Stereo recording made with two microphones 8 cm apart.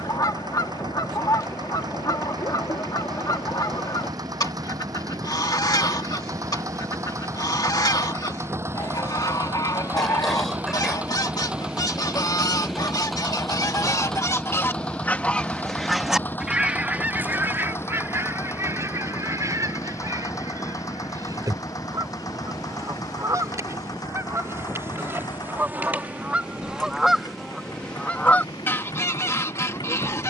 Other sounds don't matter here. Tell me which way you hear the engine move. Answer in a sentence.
You can hear the engine move from right to left.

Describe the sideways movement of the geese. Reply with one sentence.
In this clip you hear the geese move from left to right and back again.